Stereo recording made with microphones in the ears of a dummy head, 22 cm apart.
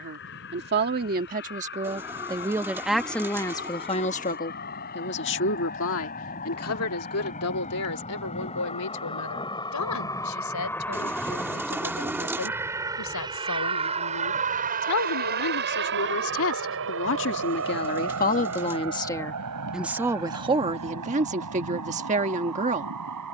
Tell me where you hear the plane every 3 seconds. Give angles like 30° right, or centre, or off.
50° left, 40° left, 30° left, 10° left, 20° right, 50° right, 70° right, 70° right.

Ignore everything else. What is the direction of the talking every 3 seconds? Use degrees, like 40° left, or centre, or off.
30° right, 30° left, 70° left, 80° left, 80° left, 60° left, centre, 30° right.